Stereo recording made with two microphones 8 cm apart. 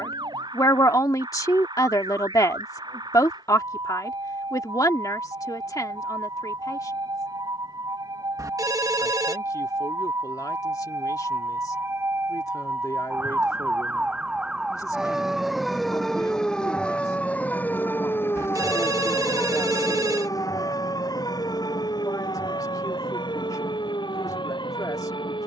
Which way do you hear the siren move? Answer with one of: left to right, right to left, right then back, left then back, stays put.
right to left.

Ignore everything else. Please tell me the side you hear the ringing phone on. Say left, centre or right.
right.